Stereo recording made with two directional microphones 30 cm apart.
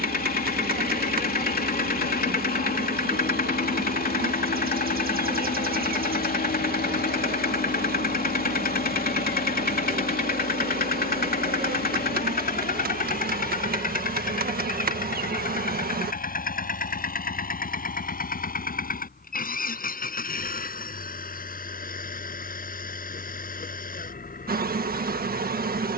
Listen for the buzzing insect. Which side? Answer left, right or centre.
right.